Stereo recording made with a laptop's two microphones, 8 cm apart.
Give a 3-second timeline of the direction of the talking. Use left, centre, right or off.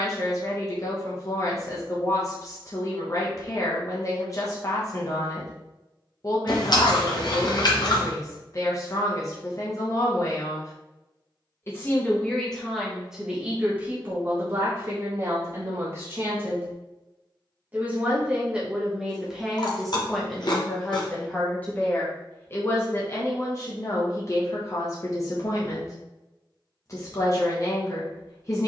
left, left, left, left, centre, right, centre, left, left, left.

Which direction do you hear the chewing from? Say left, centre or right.
left.